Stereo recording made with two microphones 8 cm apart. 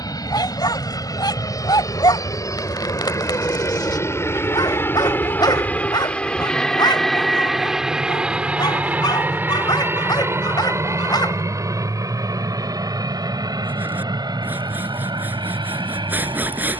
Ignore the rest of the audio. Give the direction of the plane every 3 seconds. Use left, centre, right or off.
left, left, centre, right, right, right.